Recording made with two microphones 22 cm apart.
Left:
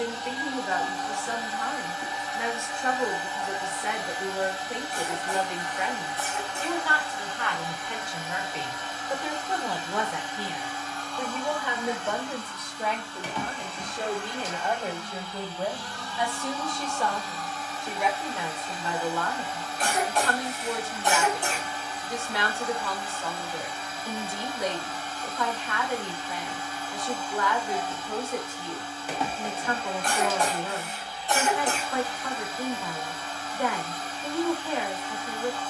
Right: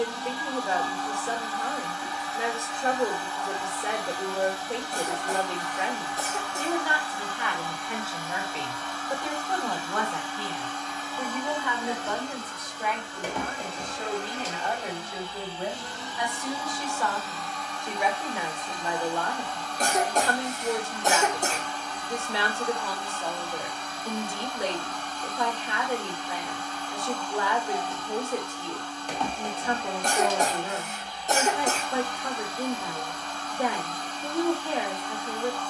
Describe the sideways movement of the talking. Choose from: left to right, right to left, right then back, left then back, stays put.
left then back.